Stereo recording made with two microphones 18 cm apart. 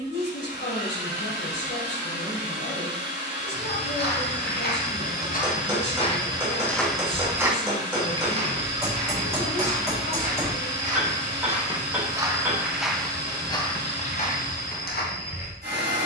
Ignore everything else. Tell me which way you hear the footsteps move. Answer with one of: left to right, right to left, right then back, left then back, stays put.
right then back.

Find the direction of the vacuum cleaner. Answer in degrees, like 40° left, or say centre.
80° right.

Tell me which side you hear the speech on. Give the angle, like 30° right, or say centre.
70° left.